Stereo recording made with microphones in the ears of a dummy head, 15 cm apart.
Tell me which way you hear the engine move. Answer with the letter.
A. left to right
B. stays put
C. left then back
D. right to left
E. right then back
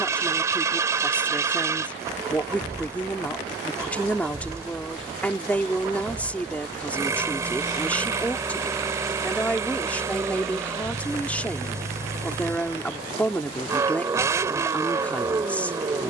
B.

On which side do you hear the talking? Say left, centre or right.
centre.